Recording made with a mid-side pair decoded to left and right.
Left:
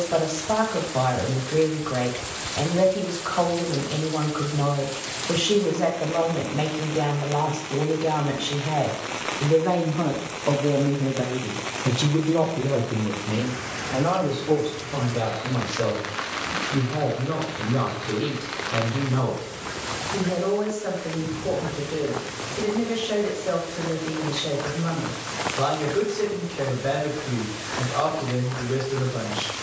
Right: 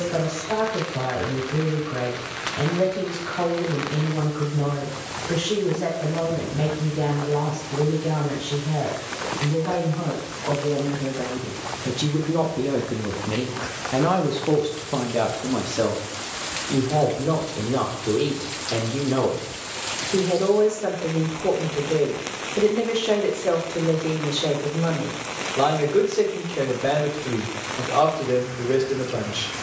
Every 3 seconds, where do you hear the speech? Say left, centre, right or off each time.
left, left, left, left, right, right, right, right, right, right.